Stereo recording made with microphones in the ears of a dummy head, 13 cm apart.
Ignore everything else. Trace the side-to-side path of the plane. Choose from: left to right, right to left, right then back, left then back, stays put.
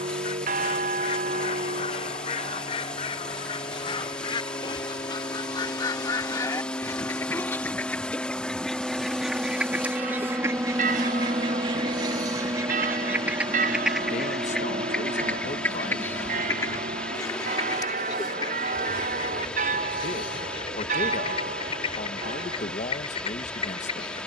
left to right.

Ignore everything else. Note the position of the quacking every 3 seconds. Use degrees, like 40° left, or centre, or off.
40° left, 30° left, 10° left, 20° right, 10° right, 20° left, 30° left, 40° left.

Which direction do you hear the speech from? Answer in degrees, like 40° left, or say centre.
50° left.